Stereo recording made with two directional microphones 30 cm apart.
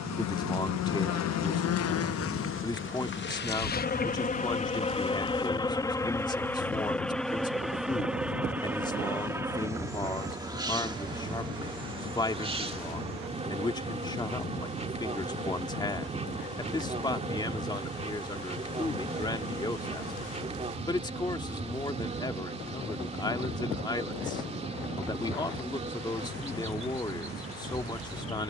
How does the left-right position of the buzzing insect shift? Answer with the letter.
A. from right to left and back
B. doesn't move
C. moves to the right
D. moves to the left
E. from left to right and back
C.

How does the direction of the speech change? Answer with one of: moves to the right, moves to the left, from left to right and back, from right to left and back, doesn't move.
doesn't move.